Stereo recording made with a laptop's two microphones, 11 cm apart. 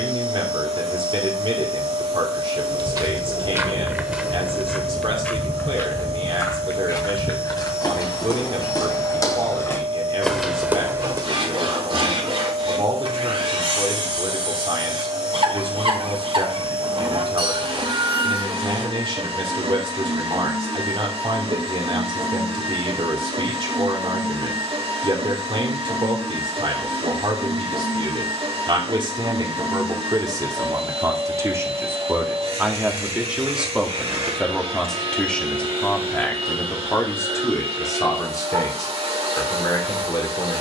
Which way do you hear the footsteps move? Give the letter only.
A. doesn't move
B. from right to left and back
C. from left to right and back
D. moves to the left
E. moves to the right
B.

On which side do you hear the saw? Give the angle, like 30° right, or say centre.
60° right.